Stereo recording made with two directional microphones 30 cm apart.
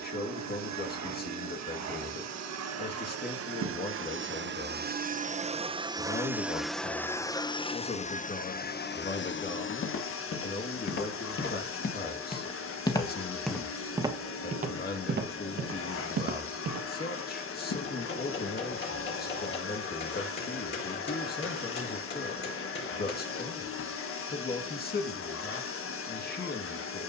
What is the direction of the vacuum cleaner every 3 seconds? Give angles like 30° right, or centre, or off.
60° right, 30° right, 10° left, 40° left, 50° left, 50° left, 50° left, 50° left, 50° left.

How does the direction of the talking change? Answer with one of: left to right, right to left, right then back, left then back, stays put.
stays put.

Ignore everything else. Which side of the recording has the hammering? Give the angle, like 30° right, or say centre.
40° left.